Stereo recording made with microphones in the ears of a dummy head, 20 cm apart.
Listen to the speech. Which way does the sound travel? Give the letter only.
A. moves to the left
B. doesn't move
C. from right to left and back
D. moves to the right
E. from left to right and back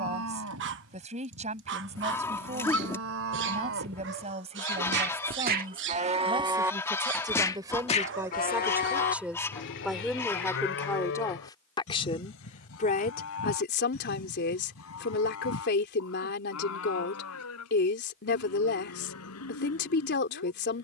A.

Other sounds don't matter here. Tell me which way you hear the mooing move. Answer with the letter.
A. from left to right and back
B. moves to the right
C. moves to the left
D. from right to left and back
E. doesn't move
C.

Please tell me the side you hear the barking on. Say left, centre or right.
right.